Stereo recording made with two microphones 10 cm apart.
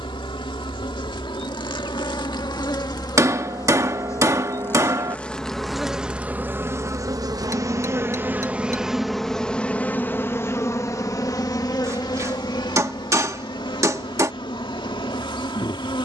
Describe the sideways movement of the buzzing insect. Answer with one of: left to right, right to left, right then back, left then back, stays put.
right then back.